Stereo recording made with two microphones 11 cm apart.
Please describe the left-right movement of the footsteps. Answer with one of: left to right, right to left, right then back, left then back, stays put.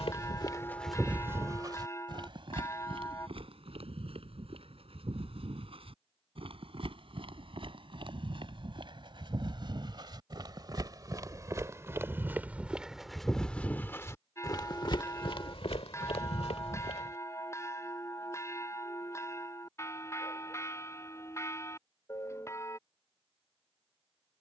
right then back.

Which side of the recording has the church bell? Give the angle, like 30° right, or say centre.
20° left.